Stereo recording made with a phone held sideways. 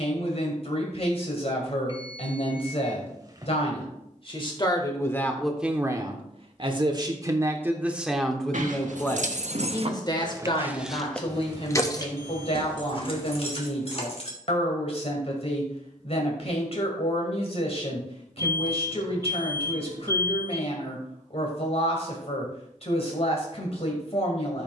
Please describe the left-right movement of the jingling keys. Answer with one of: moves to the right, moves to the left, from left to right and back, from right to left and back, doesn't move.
moves to the left.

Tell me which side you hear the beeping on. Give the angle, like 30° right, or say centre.
30° right.